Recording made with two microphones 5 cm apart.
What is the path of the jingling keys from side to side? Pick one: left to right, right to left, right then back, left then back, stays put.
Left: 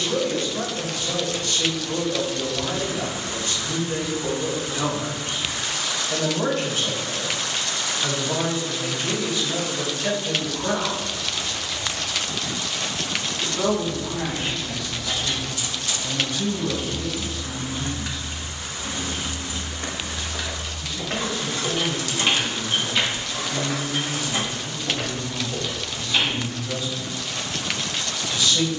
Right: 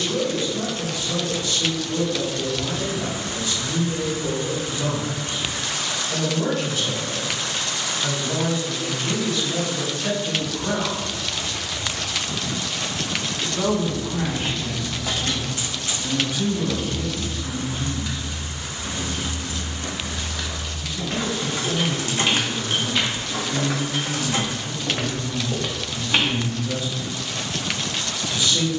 left then back.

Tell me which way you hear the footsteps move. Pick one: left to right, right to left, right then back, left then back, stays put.
left to right.